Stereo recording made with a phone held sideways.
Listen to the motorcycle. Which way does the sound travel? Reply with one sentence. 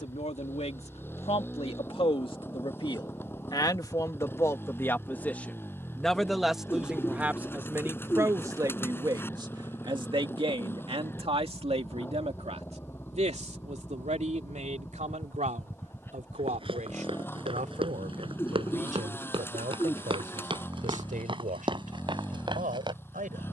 In this clip you hear the motorcycle stay in one place.